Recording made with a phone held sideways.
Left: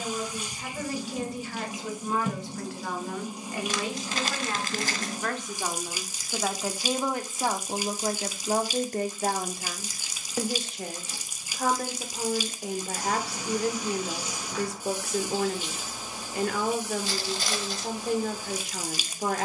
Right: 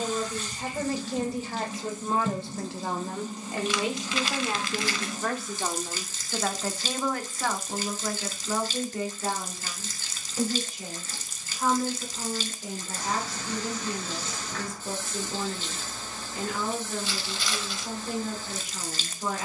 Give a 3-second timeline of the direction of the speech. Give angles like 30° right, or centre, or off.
30° right, 20° right, 30° left, 70° left, 70° left, 70° left, 70° left.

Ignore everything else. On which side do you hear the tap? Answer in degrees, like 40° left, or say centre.
10° left.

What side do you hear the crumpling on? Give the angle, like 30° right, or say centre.
40° left.